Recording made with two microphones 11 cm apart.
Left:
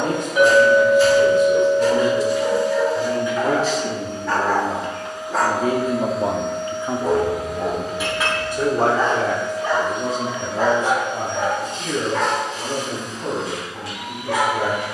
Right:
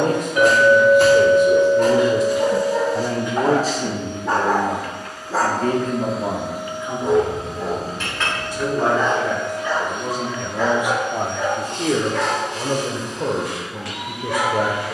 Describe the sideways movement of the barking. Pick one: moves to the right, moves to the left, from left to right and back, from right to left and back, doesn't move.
moves to the left.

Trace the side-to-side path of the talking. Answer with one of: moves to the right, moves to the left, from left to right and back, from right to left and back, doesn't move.
from right to left and back.